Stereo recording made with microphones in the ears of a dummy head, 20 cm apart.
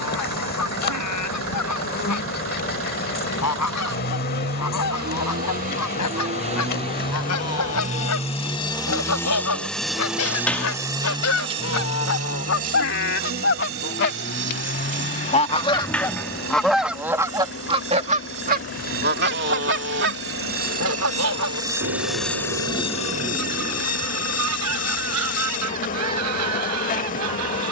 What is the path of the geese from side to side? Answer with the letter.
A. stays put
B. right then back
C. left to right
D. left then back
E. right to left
C.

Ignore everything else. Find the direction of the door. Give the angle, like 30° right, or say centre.
10° left.